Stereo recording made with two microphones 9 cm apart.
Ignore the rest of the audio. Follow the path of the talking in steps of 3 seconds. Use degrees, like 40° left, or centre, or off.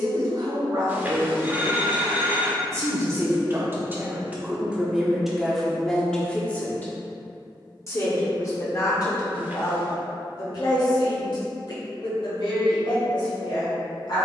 50° right, 10° right, 30° left, 50° left, 70° left.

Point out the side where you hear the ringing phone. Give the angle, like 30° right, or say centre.
20° right.